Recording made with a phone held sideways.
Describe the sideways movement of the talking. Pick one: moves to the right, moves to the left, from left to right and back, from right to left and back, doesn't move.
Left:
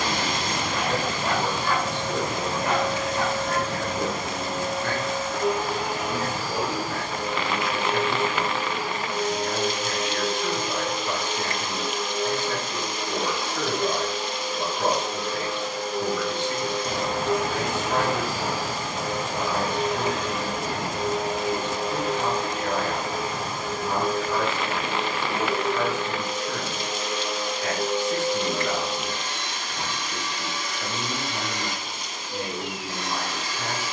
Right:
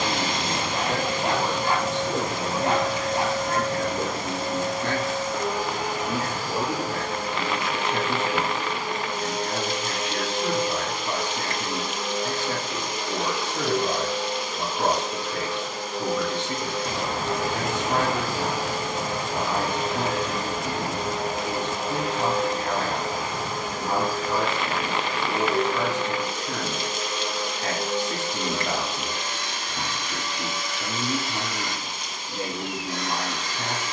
doesn't move.